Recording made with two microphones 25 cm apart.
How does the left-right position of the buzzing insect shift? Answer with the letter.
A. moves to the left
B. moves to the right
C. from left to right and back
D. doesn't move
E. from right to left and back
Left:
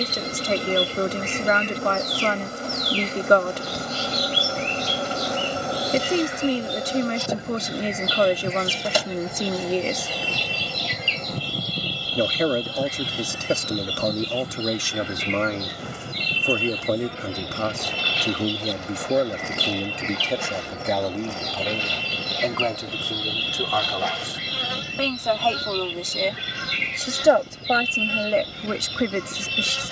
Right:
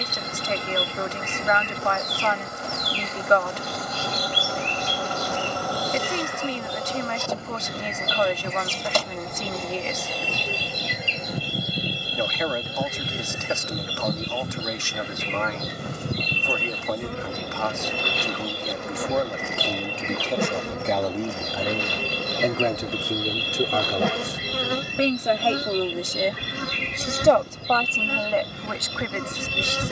B.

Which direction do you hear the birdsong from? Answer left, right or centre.
right.